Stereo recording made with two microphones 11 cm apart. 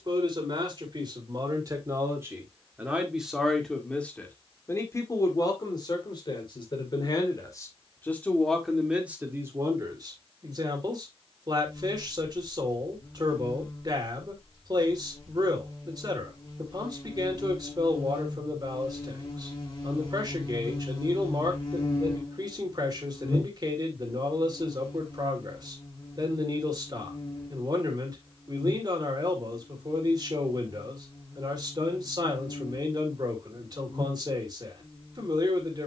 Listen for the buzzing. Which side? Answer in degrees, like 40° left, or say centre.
40° left.